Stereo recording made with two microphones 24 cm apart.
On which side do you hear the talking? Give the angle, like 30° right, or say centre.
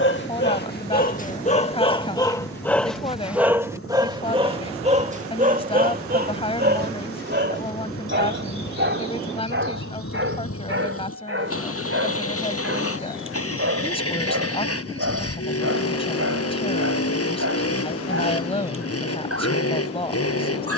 20° left.